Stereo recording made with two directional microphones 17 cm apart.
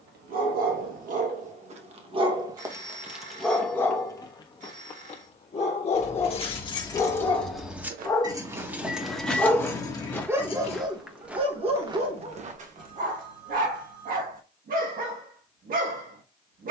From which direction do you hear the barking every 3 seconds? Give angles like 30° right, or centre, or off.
40° right, 20° left, 30° left, 20° right, 50° right, 60° right.